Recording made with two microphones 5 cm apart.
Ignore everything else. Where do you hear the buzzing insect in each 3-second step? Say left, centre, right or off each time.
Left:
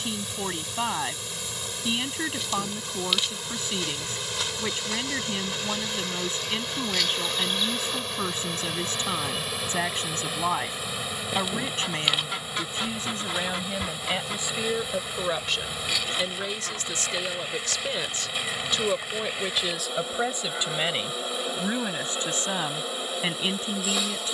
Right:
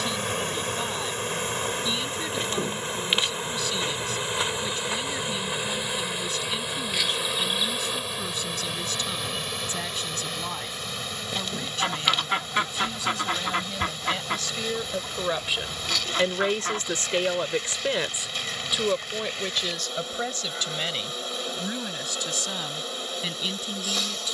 right, right, centre, centre, centre, centre, centre, centre.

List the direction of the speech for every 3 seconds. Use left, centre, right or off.
left, left, left, left, left, right, centre, left.